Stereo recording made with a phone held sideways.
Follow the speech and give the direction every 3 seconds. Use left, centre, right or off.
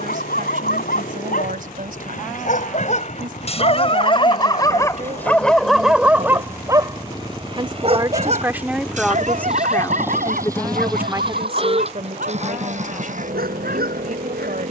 right, right, right, centre, right.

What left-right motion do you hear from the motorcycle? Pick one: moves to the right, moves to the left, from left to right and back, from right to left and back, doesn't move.
moves to the right.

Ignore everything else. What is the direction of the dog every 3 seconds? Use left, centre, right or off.
left, left, right, right, right.